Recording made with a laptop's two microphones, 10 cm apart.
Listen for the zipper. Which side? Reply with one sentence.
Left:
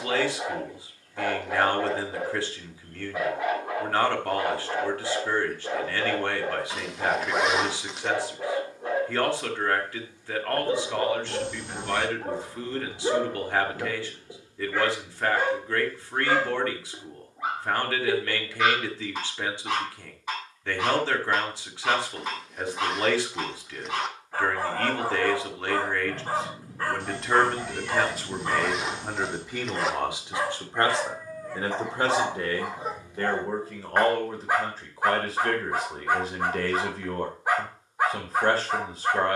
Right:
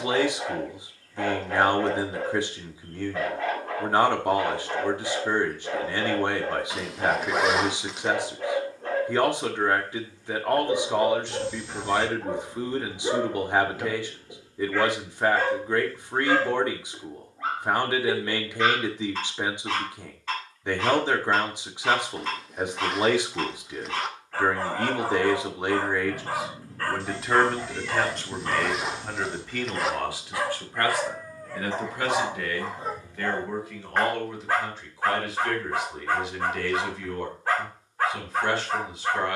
You can hear the zipper in the centre.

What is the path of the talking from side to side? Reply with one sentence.
You can hear the talking go from the right side to the left.